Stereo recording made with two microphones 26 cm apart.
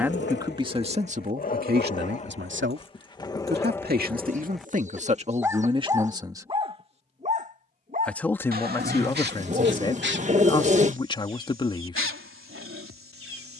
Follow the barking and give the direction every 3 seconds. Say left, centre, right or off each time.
left, centre, right, right, right.